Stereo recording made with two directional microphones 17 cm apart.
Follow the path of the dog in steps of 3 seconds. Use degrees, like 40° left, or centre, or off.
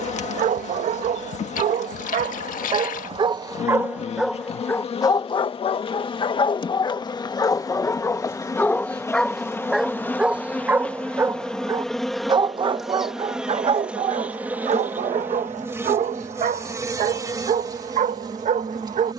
50° right, centre, 20° left, 10° right, 40° right, 50° right, 50° right.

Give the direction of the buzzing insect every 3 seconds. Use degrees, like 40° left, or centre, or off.
40° left, 40° left, 20° left, 10° left, 10° right, 20° right, 20° right.